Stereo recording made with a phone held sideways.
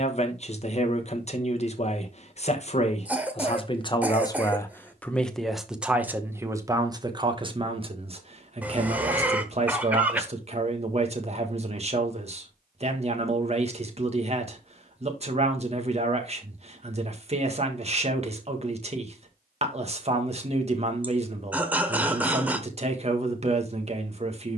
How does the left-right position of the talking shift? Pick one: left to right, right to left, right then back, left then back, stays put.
left to right.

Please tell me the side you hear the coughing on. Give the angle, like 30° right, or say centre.
10° right.